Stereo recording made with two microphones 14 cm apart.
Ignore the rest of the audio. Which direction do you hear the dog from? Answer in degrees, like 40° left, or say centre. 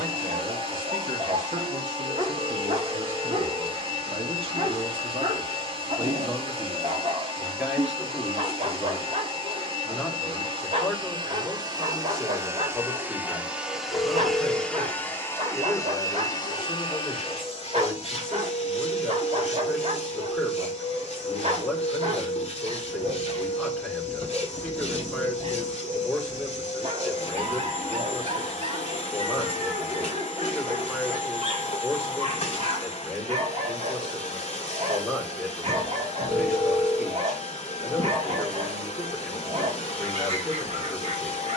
50° right.